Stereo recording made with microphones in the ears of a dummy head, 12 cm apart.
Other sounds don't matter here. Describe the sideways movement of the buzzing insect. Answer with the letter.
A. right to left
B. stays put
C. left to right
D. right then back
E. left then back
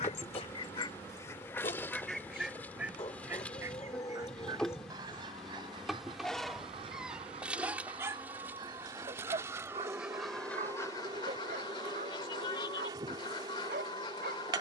C.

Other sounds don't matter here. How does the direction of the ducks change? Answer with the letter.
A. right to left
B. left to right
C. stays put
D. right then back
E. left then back
D.